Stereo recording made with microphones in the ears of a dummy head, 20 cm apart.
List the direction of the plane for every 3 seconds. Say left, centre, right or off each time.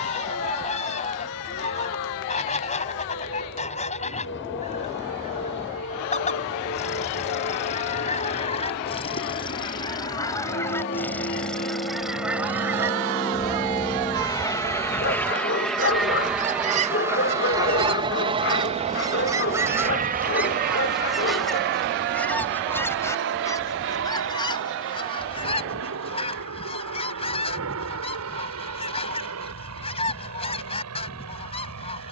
left, left, left, left, left, centre, right, right, right, right, right.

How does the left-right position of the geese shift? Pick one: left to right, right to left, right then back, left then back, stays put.
right then back.